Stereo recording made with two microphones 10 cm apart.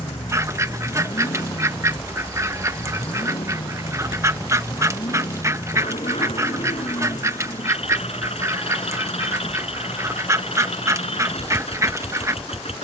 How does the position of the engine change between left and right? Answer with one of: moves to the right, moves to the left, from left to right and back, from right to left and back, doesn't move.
doesn't move.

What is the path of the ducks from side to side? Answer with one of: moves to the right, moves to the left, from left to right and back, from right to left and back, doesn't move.
doesn't move.